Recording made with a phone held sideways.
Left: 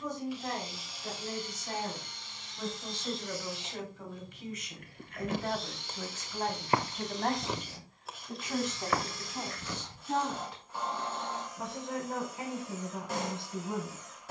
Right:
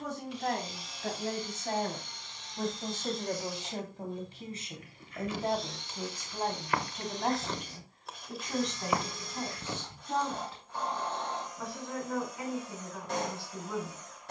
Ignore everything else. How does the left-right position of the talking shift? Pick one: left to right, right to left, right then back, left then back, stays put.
right to left.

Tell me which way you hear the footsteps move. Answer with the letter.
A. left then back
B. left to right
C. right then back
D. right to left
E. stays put
B.